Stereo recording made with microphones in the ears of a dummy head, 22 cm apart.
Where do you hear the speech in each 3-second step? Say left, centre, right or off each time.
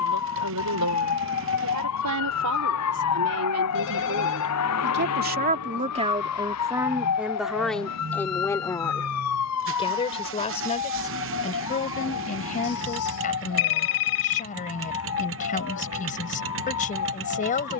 right, right, centre, left, left, left.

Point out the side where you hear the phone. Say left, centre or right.
left.